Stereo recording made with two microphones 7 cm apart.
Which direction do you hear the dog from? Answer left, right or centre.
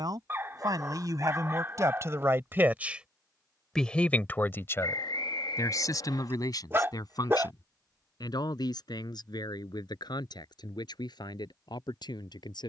right.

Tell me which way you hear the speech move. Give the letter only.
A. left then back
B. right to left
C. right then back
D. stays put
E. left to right
B.